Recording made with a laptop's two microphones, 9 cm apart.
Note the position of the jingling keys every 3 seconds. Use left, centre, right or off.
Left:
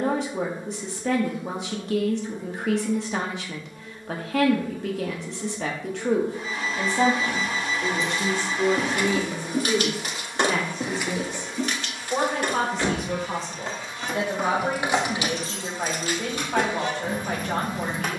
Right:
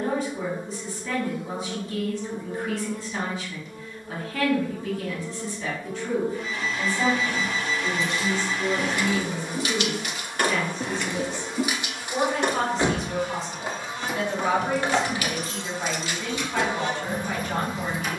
off, off, left, left, centre, left.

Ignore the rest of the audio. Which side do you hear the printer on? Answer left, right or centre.
left.